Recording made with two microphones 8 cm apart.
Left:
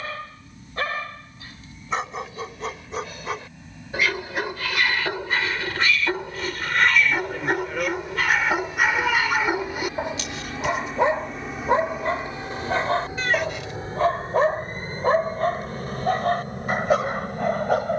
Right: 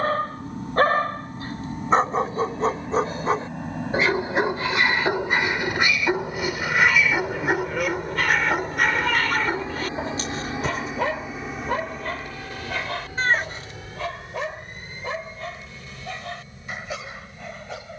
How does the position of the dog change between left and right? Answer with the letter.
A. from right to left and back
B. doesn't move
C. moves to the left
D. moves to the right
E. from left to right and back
C.